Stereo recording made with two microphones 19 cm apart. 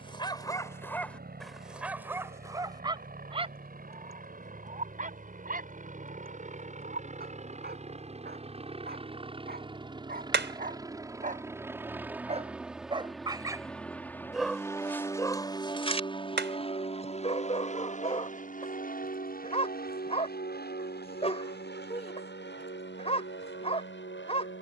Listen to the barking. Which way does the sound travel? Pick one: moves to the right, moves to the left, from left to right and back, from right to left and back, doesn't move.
from left to right and back.